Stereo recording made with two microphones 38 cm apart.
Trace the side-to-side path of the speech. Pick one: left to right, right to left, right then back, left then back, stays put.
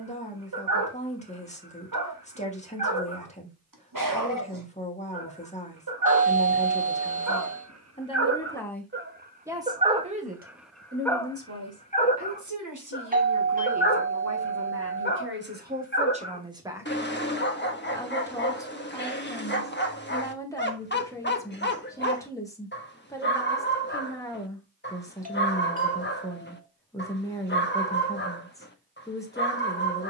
right then back.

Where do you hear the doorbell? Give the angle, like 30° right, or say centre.
20° right.